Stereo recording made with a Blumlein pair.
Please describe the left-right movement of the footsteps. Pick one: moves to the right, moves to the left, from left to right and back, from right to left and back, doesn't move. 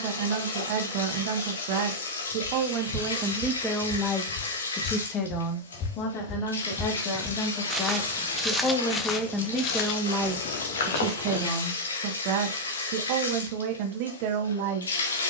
from left to right and back.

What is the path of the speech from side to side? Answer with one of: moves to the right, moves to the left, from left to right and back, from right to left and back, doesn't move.
from right to left and back.